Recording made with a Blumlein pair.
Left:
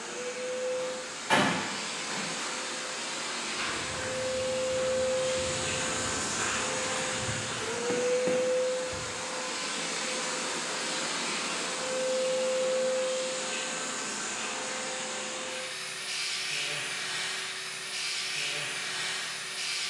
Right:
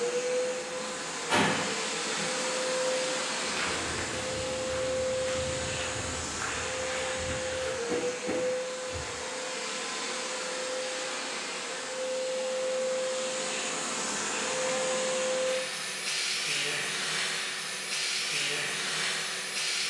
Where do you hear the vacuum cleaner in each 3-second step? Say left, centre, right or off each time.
right, centre, left, left, centre, right, right.